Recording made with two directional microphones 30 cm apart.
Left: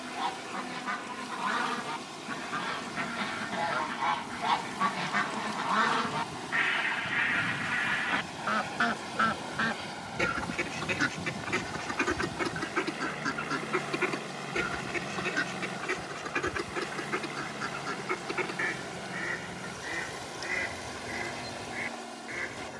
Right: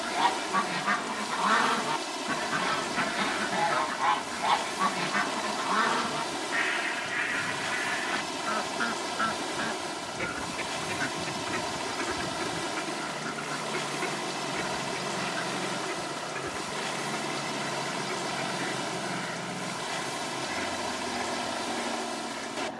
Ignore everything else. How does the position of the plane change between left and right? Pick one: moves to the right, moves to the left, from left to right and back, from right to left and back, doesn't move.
moves to the right.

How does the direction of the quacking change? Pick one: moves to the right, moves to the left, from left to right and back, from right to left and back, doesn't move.
moves to the left.